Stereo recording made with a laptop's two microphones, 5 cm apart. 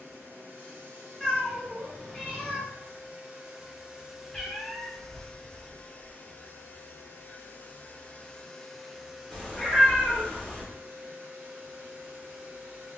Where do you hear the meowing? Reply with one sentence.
You can hear the meowing on the left.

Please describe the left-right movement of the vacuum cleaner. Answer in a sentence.
You can hear the vacuum cleaner move from right to left and back again.